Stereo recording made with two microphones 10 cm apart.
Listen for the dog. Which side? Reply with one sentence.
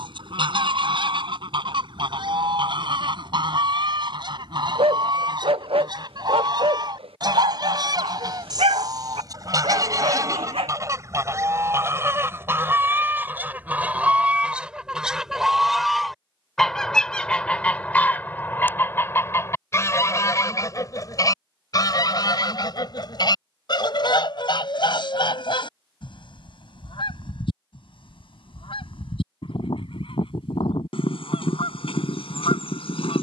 In this clip you hear the dog on the right.